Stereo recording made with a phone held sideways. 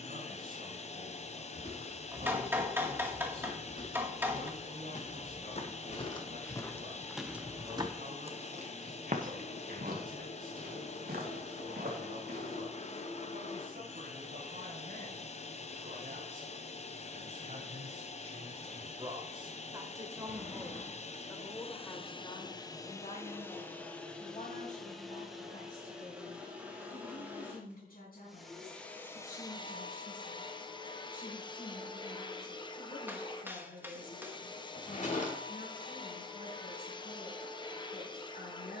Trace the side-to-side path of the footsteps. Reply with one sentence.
You can hear the footsteps go from the left side to the right.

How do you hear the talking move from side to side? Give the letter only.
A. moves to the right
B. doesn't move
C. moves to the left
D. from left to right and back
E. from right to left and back
C.